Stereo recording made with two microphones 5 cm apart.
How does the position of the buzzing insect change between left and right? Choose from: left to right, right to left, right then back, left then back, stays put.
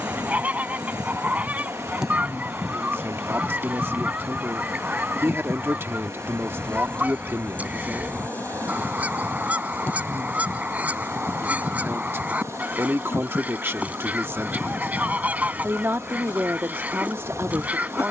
right to left.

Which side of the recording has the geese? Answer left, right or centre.
right.